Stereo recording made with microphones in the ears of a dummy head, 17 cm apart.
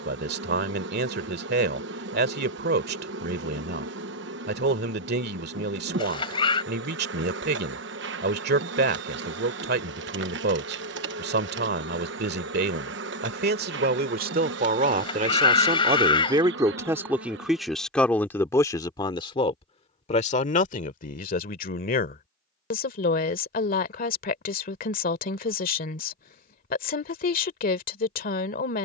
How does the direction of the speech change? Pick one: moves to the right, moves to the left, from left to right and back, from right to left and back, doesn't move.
moves to the left.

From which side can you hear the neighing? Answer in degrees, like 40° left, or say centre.
30° left.